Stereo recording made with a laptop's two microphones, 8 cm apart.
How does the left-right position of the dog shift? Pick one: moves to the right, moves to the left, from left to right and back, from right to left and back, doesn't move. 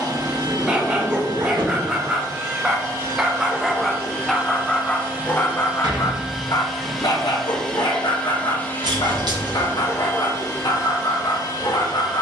moves to the left.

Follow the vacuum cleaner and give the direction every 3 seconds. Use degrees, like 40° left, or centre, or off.
50° right, 30° right, 10° left, 40° left.